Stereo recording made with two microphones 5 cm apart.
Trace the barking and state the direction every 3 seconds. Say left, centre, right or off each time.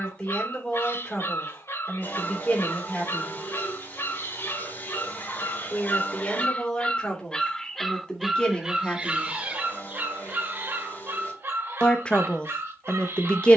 left, left, centre, right, right.